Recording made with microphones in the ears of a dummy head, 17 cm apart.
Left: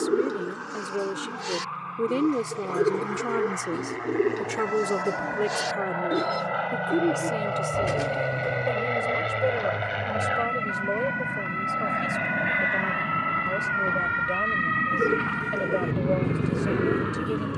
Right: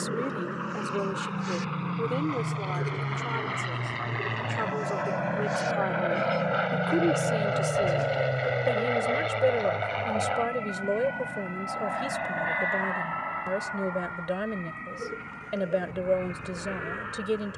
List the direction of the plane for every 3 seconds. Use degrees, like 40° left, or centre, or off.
70° right, 50° right, 20° right, 10° left, 40° left, 50° left.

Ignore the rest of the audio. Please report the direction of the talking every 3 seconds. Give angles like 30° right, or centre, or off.
20° left, 50° left, centre, 20° right, 20° right, 20° right.